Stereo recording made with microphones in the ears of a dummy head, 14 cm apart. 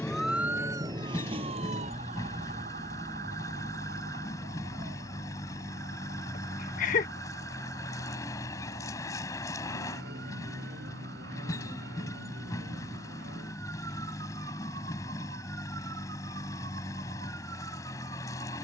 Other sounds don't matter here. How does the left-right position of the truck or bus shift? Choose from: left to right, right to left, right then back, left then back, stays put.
stays put.